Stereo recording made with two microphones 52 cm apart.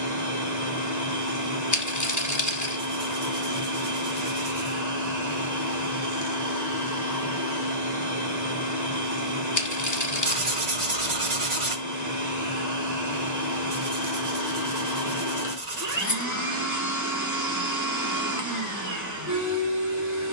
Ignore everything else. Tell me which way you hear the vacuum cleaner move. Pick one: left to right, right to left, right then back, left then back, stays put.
stays put.